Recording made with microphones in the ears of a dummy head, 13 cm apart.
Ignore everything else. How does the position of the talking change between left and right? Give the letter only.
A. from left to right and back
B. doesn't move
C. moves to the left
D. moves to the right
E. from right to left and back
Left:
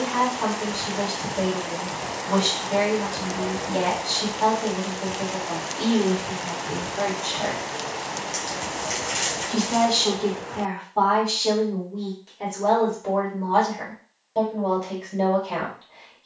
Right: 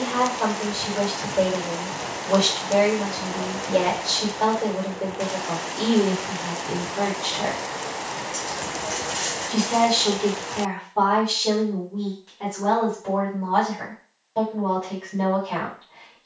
C.